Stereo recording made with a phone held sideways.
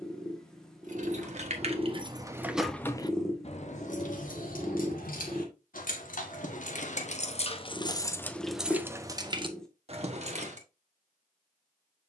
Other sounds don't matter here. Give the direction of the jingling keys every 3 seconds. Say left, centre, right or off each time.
right, left, left, right.